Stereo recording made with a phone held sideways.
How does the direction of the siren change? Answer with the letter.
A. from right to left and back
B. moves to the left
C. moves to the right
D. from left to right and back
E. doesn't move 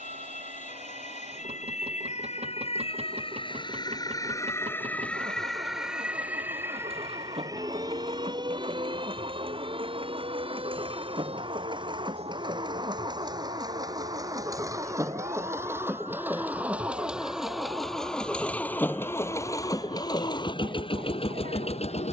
C.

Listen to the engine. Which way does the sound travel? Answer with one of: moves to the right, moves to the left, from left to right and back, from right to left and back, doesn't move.
moves to the left.